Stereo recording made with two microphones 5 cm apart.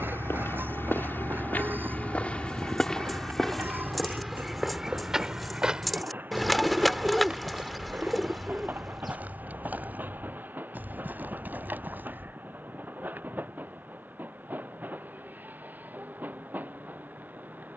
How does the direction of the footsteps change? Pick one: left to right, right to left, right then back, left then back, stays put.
left to right.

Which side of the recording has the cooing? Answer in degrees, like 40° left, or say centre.
centre.